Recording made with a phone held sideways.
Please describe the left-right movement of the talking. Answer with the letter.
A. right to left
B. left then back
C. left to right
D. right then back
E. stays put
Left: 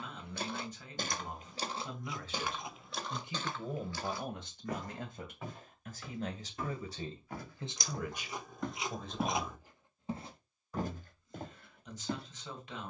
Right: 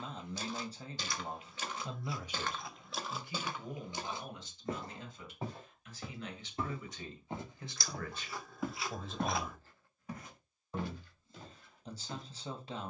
B.